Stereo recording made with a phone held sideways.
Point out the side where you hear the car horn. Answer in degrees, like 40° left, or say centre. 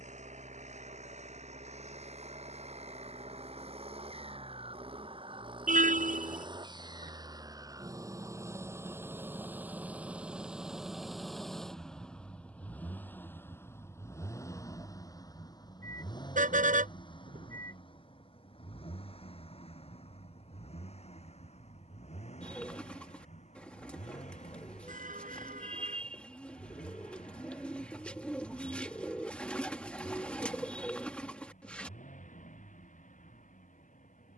70° right.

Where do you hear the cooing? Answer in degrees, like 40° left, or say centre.
10° left.